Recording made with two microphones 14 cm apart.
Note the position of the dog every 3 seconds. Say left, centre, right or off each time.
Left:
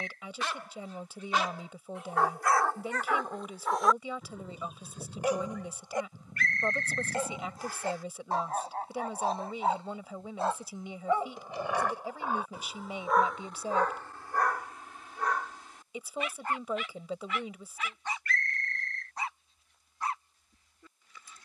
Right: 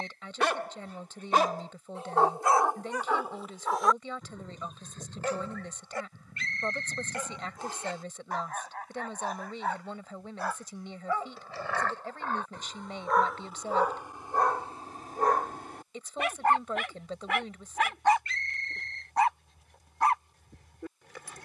right, centre, left, left, centre, right, right.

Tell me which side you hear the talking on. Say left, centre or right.
centre.